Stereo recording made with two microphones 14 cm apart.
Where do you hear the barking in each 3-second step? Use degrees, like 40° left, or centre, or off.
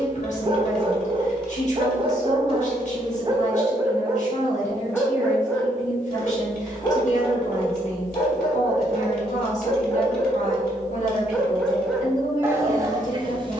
40° right, 10° right, 30° left, 20° left, 30° right.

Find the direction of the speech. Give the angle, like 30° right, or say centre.
60° left.